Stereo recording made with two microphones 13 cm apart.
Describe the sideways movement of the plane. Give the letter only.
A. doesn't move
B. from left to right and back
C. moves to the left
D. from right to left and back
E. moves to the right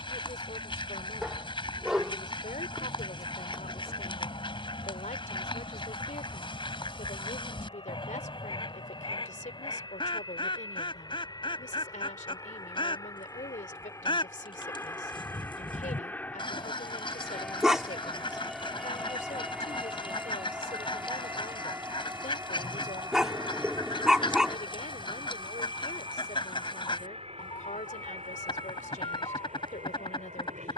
E.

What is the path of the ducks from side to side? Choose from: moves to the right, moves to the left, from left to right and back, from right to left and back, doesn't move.
doesn't move.